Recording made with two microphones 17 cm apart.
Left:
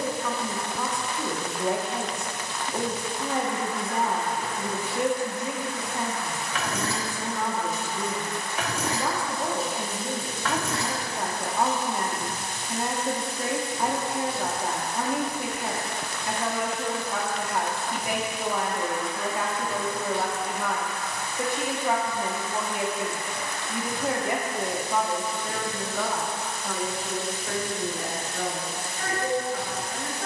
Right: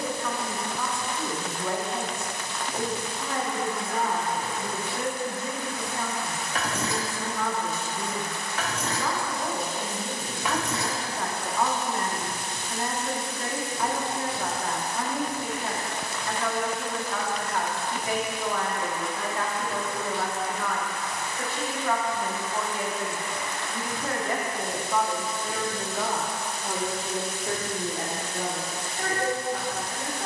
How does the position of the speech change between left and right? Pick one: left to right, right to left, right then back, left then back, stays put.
left to right.